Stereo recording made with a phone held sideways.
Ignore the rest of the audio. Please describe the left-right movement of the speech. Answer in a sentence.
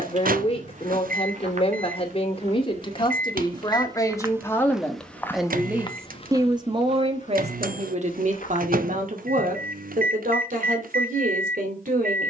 In this clip you hear the speech go from the left side to the right.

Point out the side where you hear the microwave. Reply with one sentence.
You can hear the microwave on the right.